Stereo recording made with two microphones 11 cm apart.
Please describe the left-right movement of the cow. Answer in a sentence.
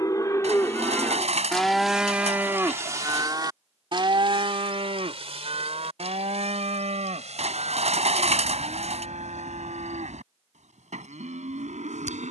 In this clip you hear the cow move to the right.